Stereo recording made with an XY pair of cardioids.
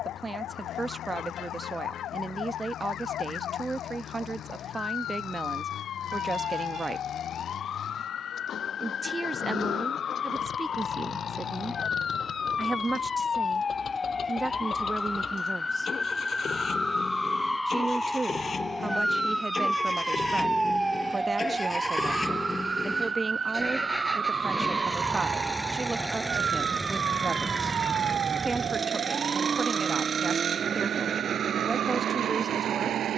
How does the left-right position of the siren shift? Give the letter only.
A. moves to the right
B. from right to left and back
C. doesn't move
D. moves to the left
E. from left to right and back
A.